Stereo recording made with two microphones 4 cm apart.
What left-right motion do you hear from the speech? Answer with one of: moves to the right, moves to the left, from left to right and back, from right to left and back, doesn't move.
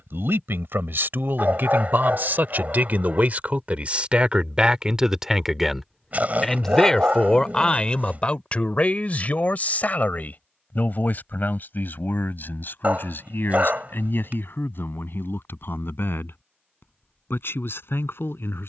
moves to the left.